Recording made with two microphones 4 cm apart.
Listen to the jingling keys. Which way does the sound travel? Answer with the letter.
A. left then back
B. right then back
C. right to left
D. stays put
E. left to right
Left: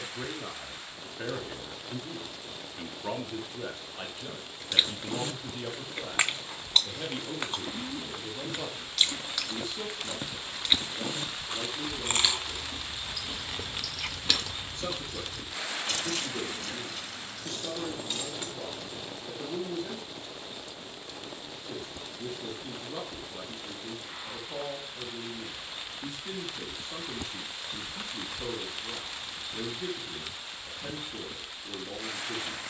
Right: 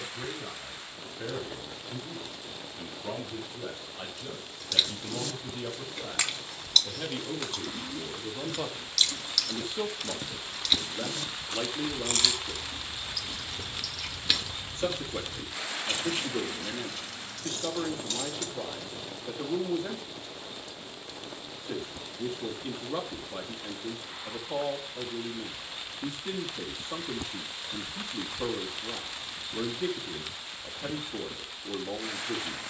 B.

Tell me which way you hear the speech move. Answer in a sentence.
You can hear the speech go from the left side to the right.